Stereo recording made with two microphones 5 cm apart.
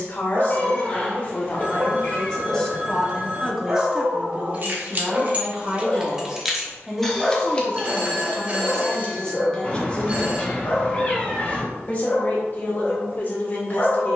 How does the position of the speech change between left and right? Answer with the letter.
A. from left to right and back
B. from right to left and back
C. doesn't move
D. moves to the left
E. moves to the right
A.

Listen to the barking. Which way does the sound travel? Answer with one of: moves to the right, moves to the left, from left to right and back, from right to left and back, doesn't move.
moves to the left.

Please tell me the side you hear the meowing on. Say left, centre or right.
left.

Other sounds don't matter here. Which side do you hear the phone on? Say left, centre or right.
right.